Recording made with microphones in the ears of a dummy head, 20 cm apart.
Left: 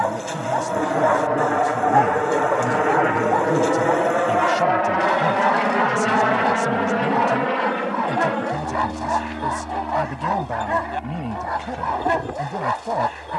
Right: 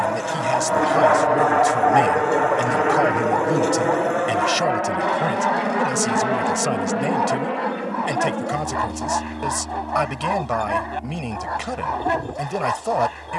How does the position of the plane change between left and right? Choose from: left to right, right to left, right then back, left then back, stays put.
right to left.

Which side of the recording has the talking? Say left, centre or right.
right.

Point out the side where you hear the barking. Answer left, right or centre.
centre.